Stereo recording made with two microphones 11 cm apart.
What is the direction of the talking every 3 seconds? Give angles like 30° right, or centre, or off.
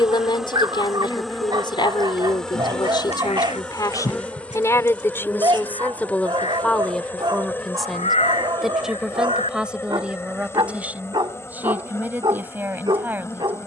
50° left, 30° left, centre, 10° right, 20° right.